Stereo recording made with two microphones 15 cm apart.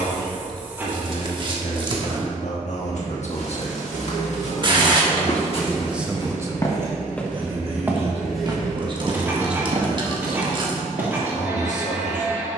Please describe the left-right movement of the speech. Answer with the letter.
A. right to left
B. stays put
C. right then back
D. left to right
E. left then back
C.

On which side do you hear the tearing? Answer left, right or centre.
right.